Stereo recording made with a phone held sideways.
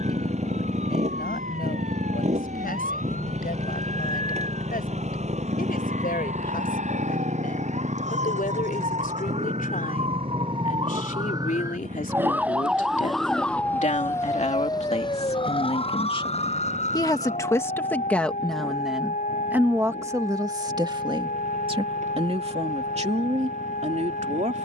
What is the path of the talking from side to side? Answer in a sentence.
You can hear the talking go from the left side to the right.